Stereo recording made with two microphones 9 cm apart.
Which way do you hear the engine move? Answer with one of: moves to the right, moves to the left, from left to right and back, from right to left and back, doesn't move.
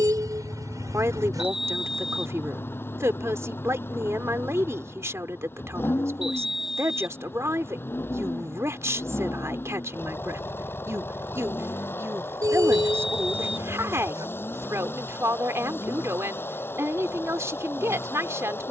doesn't move.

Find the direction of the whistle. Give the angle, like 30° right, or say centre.
centre.